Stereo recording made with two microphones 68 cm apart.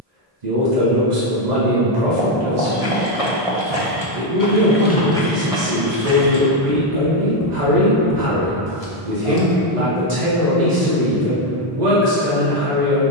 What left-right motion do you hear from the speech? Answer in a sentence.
You can hear the speech stay put.